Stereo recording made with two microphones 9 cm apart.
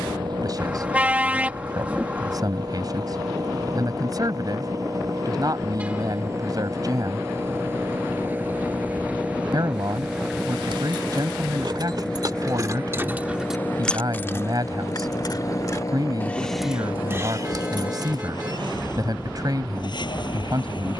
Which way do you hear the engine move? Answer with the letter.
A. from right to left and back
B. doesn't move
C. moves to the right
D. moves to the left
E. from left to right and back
D.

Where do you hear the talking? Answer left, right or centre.
right.